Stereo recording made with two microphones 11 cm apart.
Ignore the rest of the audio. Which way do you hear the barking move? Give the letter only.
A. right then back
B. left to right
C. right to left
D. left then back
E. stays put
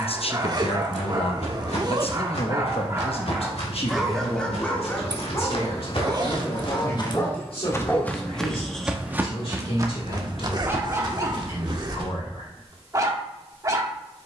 D.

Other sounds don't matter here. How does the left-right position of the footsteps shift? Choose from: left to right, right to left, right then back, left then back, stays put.
left to right.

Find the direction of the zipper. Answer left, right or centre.
right.